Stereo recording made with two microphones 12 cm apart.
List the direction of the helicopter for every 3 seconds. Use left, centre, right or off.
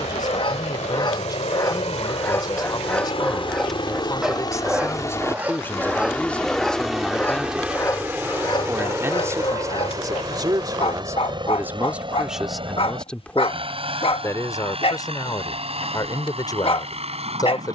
left, left, centre, right, right, right.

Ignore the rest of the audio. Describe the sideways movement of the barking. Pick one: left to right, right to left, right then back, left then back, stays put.
right then back.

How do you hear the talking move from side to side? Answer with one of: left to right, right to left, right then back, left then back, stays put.
right then back.